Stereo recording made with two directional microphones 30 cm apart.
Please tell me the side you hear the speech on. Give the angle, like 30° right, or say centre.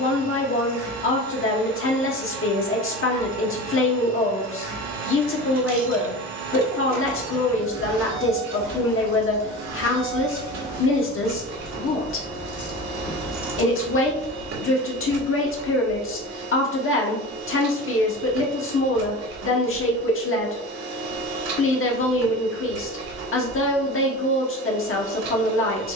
40° left.